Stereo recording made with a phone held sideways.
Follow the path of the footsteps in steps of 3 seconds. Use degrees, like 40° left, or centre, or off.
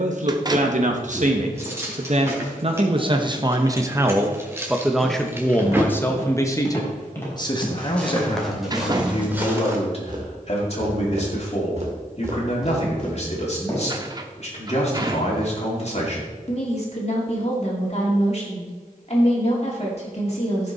off, 20° left, 10° left, 30° right, centre, off, off.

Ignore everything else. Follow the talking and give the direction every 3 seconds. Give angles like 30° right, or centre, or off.
50° right, 10° right, 30° left, 50° left, 50° left, 50° left, 50° left.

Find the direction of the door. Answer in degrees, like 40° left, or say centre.
30° right.